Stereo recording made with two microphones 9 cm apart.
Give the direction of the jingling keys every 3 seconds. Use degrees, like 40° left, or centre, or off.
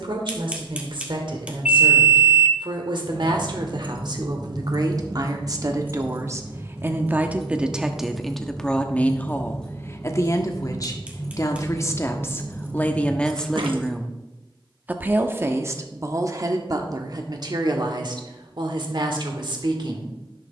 off, 50° right, 10° right, 10° left, 40° right, off, off.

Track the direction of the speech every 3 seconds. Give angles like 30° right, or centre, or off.
60° right, 50° right, 10° right, 30° left, 10° left, 40° right, 60° right.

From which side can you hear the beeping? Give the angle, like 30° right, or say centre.
10° right.